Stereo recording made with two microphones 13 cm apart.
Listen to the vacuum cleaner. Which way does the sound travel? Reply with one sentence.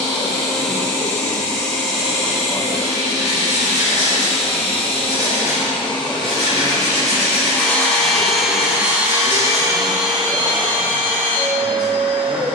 You can hear the vacuum cleaner move from left to right.